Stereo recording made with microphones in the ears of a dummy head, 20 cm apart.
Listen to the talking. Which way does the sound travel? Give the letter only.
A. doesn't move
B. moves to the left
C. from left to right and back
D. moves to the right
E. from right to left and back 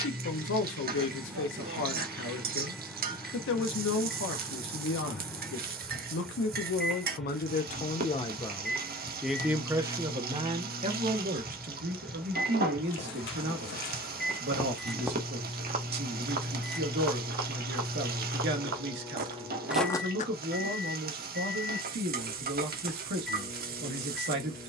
D.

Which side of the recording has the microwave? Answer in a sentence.
You can hear the microwave in the centre.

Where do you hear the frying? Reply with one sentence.
In this clip you hear the frying on the right.